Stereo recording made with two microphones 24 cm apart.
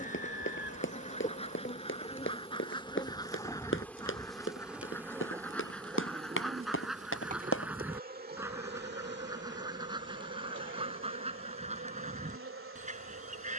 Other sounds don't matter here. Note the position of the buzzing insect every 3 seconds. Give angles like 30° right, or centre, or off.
30° left, centre, 30° right, 50° right, 60° right.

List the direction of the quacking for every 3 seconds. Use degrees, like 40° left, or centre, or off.
20° left, 10° left, centre, 20° right, 30° right.